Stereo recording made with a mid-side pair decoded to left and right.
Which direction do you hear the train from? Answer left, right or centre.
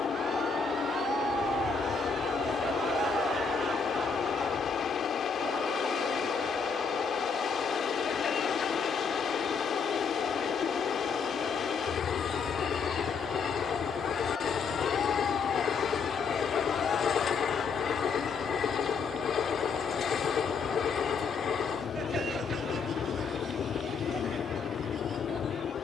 left.